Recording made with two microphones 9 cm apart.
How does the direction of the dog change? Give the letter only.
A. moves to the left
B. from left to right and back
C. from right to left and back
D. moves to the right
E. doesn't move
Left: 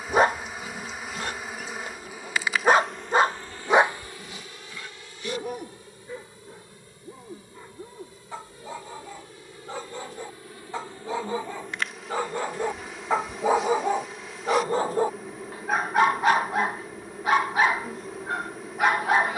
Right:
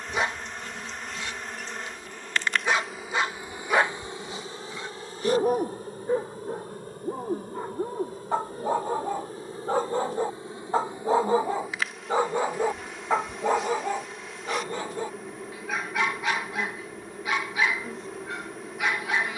B.